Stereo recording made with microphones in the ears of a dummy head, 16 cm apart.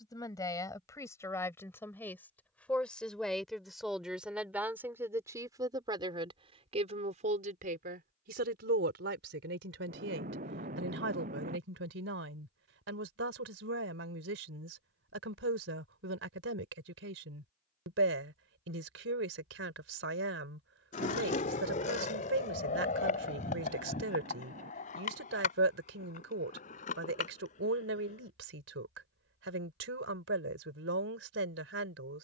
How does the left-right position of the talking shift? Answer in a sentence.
You can hear the talking move from left to right.